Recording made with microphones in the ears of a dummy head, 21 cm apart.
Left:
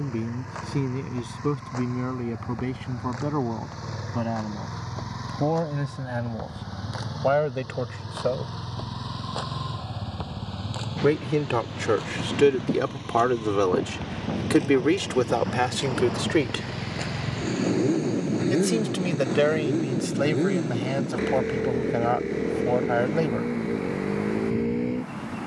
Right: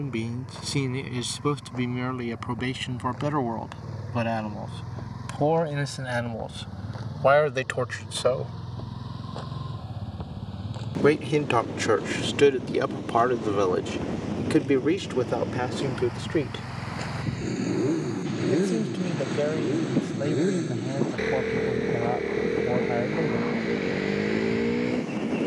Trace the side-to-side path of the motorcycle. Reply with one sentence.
In this clip you hear the motorcycle move from left to right.